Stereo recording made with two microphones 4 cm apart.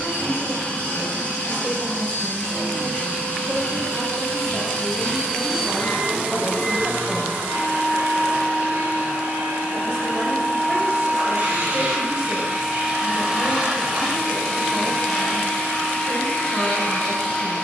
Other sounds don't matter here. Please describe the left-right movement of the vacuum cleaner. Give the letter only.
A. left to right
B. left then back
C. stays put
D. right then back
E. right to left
D.